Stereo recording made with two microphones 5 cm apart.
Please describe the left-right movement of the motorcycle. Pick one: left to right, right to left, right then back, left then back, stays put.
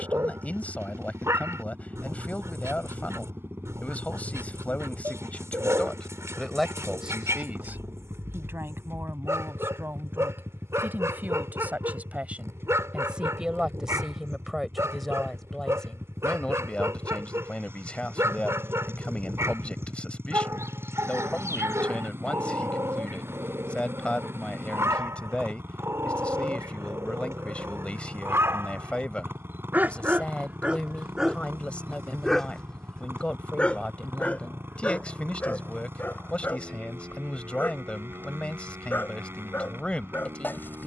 stays put.